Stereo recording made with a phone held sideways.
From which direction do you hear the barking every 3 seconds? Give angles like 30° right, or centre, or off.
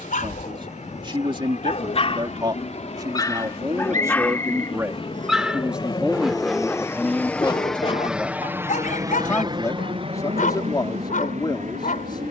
60° left, 10° left, 30° left, 80° left.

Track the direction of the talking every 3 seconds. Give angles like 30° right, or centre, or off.
30° right, 20° right, centre, 30° left.